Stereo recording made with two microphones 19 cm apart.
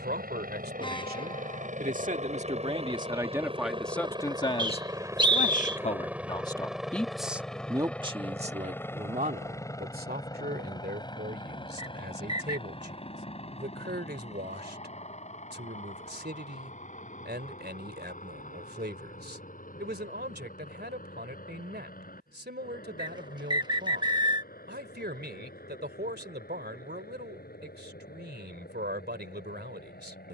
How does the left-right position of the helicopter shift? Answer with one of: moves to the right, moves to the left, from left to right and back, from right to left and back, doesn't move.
moves to the left.